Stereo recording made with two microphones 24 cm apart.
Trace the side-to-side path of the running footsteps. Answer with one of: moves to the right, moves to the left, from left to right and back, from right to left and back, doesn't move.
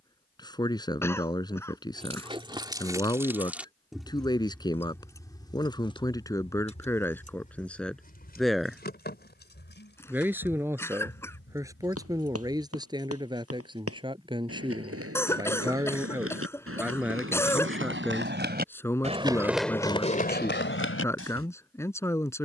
moves to the left.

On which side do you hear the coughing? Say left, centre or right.
centre.